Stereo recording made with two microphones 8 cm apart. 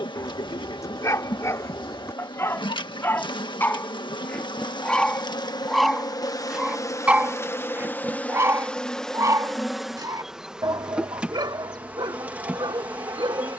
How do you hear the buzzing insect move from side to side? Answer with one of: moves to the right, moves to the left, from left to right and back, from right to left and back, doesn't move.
moves to the right.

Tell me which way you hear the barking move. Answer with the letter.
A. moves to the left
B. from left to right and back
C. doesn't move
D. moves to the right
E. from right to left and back
D.